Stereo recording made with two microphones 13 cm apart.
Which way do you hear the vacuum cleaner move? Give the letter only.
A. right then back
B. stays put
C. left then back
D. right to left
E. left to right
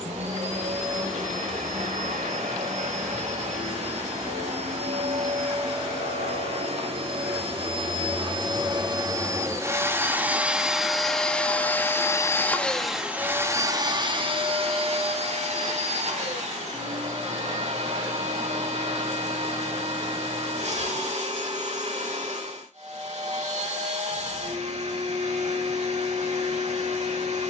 C.